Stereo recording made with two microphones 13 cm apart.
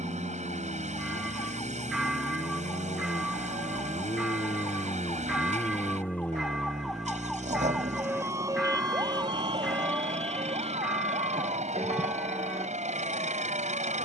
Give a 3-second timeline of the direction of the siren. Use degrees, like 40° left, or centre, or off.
50° left, 30° left, 10° right, 50° right, 70° right.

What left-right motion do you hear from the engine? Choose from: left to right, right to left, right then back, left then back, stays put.
stays put.